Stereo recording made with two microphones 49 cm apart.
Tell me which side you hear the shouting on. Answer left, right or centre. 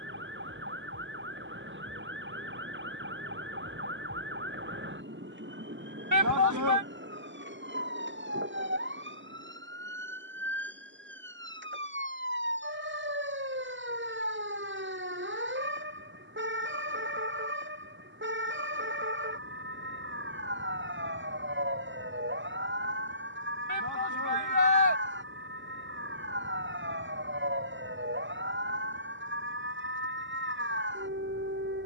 right.